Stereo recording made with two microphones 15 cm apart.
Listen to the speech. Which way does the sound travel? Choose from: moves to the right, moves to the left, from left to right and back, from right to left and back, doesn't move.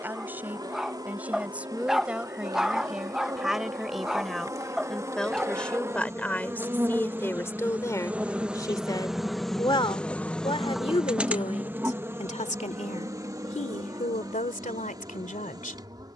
moves to the left.